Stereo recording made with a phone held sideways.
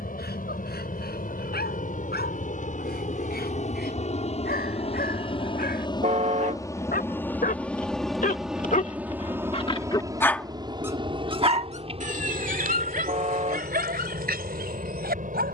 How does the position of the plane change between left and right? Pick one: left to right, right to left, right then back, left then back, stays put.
left to right.